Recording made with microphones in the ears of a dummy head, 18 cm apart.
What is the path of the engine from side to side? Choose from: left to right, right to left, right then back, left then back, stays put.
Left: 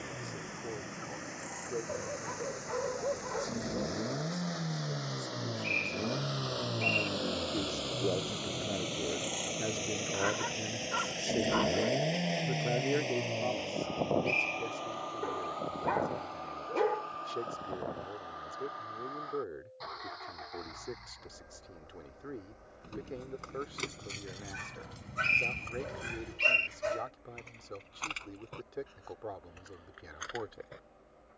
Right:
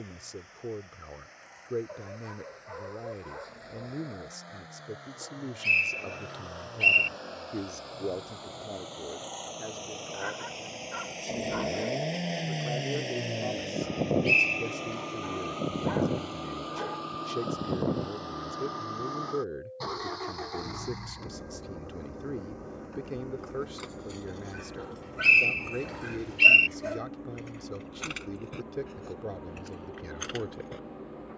left to right.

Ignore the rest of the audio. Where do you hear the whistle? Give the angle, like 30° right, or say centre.
70° right.